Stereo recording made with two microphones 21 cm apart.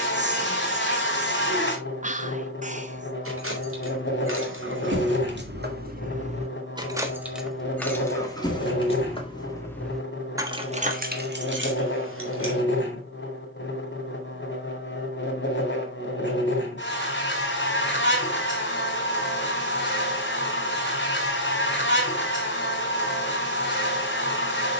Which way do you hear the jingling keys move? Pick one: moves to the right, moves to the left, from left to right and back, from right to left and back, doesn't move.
from right to left and back.